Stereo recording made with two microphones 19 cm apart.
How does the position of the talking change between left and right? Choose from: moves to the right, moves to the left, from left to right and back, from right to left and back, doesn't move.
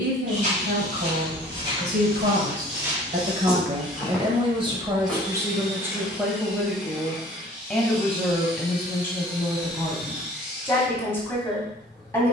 moves to the left.